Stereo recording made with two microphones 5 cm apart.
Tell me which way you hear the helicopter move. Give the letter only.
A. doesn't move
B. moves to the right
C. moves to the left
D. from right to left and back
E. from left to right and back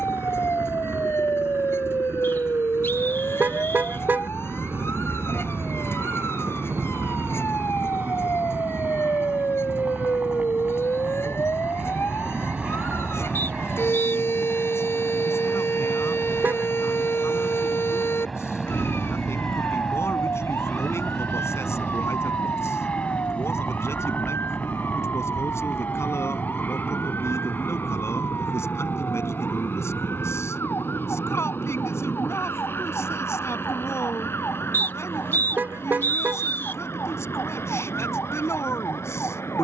C.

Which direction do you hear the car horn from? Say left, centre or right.
right.